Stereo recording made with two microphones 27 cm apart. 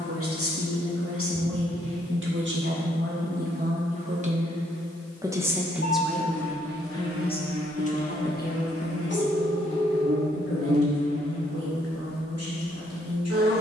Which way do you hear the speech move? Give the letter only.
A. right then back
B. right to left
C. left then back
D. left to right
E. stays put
B.